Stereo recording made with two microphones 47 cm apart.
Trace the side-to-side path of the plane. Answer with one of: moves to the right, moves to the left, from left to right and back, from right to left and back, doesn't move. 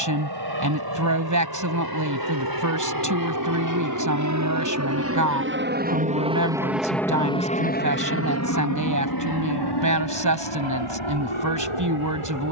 moves to the left.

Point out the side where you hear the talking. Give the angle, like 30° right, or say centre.
40° right.